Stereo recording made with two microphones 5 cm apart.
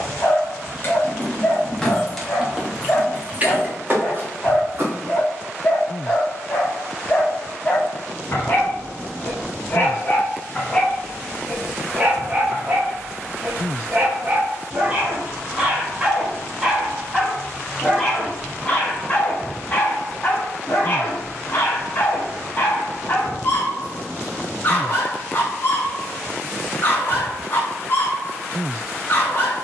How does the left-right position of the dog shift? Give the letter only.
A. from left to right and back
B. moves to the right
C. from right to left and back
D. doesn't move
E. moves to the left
A.